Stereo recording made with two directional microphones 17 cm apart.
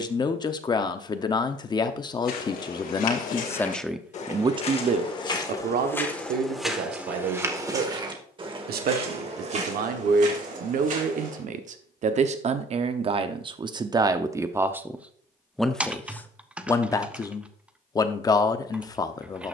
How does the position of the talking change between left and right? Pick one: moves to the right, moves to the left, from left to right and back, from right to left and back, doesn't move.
from left to right and back.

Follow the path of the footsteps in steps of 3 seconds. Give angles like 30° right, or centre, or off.
60° left, 40° left, 10° right, 50° right, off, off, off.